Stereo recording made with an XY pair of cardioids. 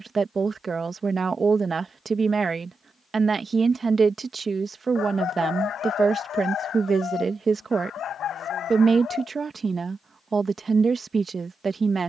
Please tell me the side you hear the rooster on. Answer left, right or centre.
left.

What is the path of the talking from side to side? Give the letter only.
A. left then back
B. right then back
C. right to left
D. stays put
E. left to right
D.